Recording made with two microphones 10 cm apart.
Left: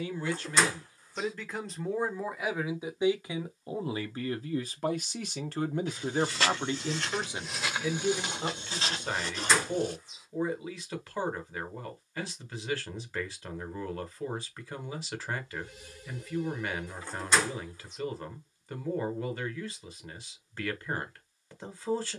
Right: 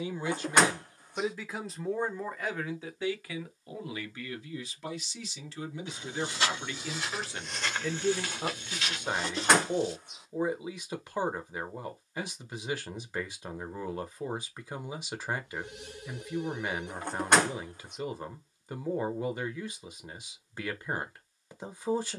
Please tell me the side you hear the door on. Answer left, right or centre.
right.